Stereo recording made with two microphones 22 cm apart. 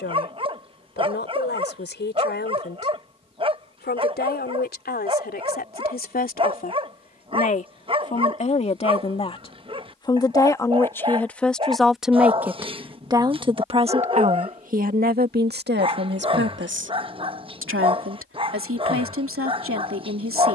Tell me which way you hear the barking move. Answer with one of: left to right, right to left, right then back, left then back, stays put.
stays put.